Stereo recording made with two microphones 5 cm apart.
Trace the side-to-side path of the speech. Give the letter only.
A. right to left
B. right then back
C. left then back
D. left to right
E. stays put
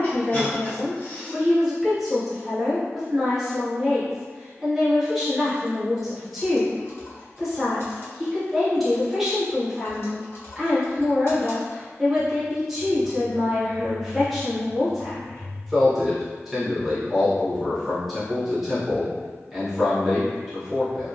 E.